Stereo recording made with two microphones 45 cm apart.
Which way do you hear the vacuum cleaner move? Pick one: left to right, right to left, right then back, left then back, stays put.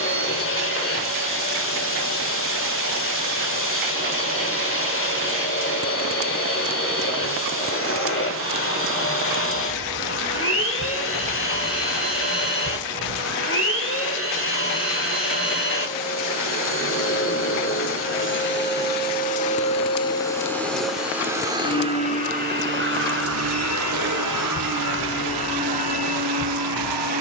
left to right.